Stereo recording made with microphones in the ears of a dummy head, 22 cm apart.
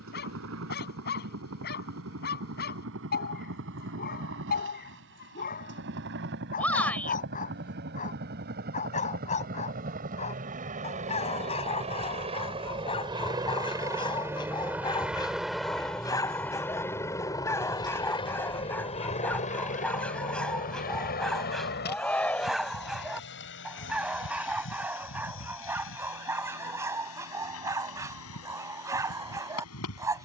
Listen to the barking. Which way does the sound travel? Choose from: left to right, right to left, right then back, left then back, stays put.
left to right.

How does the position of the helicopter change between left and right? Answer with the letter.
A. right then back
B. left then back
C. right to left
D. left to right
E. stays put
C.